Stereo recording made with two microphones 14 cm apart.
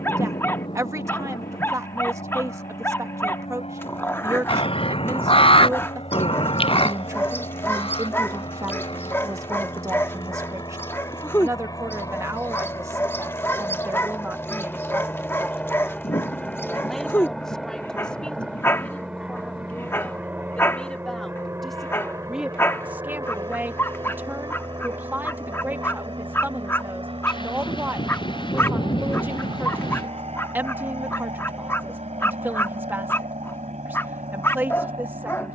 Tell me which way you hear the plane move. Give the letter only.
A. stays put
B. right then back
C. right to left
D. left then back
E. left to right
E.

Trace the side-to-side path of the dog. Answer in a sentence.
In this clip you hear the dog stay in one place.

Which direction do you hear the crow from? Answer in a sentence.
You can hear the crow on the left.